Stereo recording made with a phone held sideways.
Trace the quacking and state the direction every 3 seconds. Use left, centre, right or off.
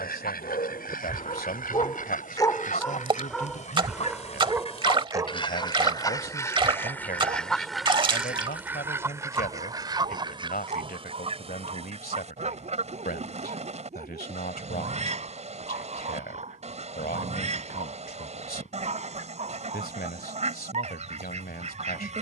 left, left, centre, right, right, right, right, right.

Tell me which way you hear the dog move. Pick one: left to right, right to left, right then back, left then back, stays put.
left to right.